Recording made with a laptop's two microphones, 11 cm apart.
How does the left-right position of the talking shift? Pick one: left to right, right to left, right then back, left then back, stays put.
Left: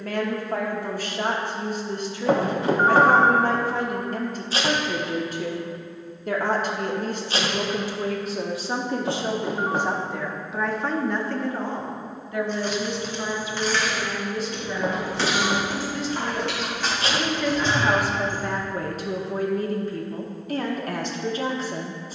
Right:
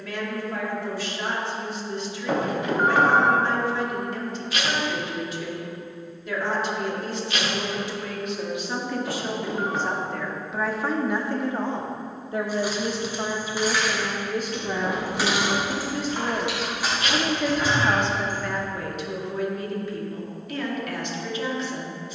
right then back.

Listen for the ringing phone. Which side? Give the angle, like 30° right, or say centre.
30° left.